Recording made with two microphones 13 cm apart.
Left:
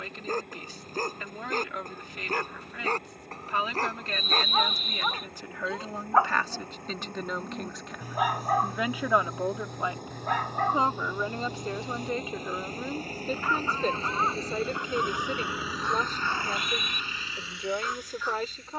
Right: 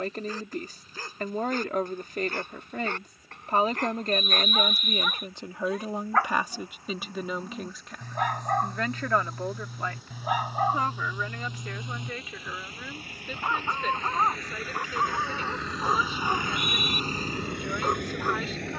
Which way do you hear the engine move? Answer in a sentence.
In this clip you hear the engine travel towards the right.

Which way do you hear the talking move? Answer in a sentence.
You can hear the talking move to the left.